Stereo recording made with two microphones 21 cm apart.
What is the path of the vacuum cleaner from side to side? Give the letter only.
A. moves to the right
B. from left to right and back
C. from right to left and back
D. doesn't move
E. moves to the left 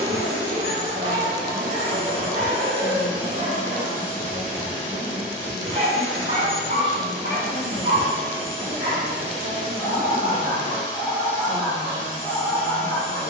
D.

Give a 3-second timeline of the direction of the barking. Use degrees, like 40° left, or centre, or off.
40° right, 40° right, 30° right, 10° right, 10° left.